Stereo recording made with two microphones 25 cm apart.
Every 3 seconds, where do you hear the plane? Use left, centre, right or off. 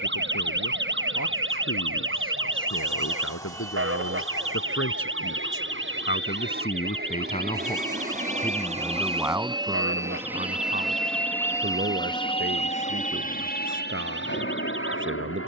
right, right, right, centre, left.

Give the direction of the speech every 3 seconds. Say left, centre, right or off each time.
left, left, left, right, right.